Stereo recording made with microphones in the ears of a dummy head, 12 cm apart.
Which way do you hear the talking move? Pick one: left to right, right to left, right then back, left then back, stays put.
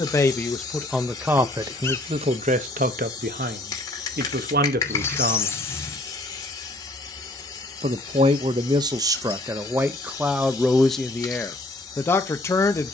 right then back.